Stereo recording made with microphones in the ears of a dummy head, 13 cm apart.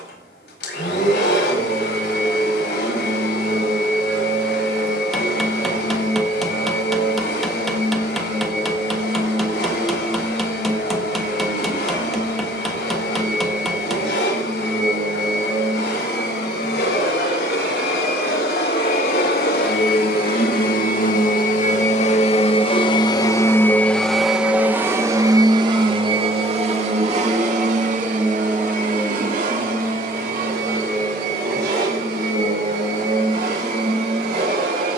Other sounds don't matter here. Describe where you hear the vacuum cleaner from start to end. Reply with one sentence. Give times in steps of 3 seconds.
You can hear the vacuum cleaner on the left from 0 s and on the right from 24 s.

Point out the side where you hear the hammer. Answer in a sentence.
You can hear the hammer in the centre.